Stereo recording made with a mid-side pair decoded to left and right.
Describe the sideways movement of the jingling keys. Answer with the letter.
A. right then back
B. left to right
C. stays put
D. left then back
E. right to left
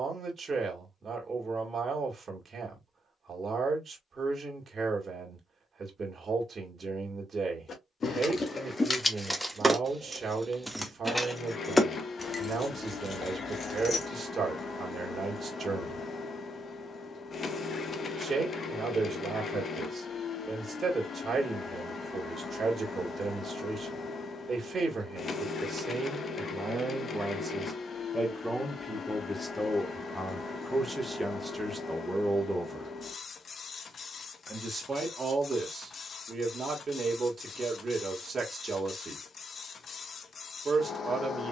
A.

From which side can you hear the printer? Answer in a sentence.
You can hear the printer on the left.